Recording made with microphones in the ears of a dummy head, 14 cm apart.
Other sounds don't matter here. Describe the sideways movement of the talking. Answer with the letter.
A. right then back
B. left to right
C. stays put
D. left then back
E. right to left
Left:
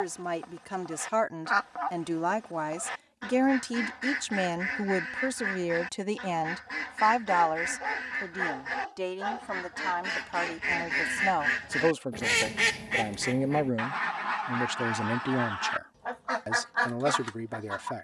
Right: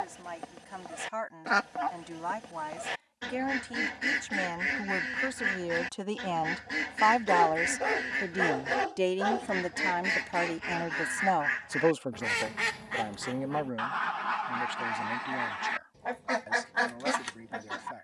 A.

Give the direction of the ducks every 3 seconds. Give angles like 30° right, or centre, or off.
30° right, 30° right, 30° right, centre, 10° left, 20° right.